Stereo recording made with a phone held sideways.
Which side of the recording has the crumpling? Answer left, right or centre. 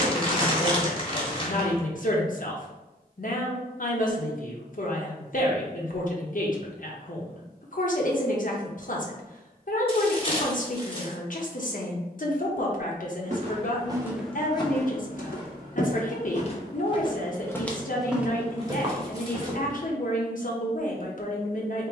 left.